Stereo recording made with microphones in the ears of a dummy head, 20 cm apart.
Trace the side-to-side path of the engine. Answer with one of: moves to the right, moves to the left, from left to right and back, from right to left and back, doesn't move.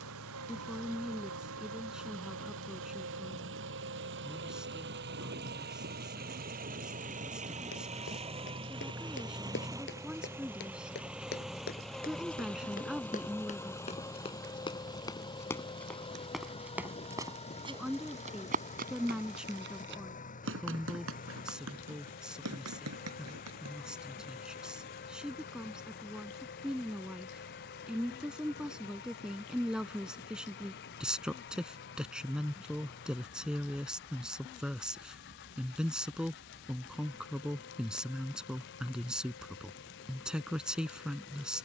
moves to the left.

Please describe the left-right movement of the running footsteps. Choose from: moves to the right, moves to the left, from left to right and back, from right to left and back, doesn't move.
moves to the right.